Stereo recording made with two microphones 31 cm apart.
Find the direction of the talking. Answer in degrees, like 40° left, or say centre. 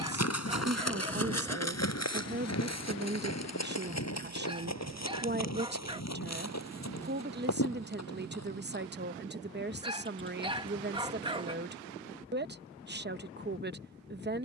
30° right.